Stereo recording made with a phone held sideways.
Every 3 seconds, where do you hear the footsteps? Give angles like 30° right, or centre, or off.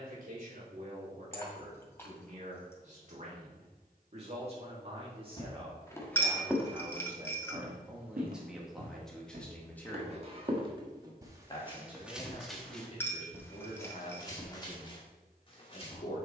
off, 30° left, 30° right, 30° right, 10° left, 40° left.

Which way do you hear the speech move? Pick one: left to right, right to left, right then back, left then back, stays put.
right to left.